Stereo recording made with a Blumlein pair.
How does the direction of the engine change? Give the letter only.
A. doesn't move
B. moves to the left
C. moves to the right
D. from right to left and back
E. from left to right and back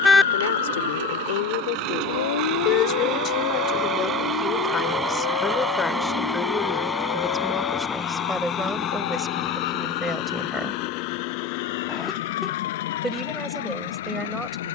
B.